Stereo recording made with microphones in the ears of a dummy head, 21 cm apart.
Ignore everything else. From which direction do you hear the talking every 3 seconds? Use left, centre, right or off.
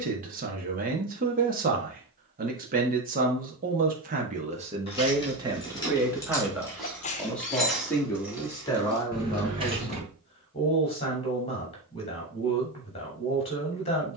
right, right, centre, left, left.